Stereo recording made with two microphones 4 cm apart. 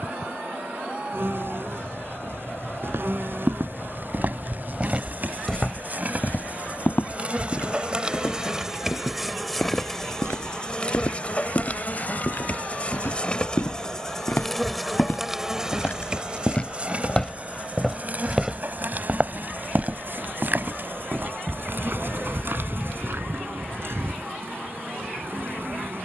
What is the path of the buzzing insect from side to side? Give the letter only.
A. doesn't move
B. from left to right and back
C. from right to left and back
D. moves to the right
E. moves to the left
C.